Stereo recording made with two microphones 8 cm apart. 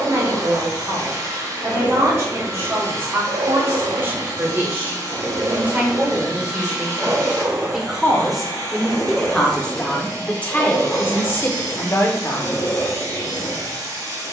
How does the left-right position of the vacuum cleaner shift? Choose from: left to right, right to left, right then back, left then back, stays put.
stays put.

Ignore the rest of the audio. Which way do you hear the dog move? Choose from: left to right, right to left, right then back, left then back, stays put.
right to left.